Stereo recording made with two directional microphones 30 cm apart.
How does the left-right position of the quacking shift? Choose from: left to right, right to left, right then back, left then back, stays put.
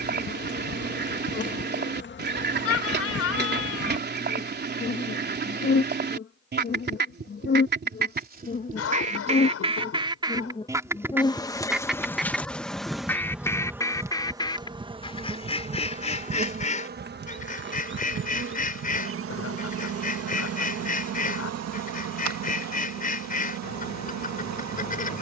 right to left.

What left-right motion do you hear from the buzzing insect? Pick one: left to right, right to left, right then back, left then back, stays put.
left to right.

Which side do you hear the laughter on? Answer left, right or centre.
left.